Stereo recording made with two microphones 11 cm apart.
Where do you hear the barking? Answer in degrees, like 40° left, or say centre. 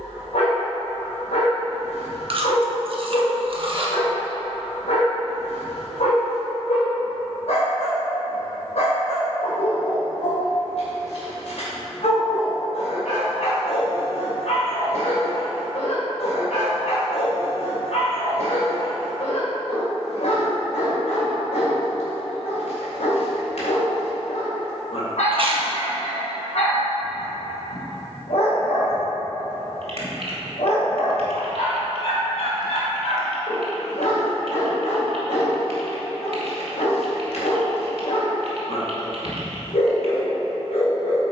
80° left.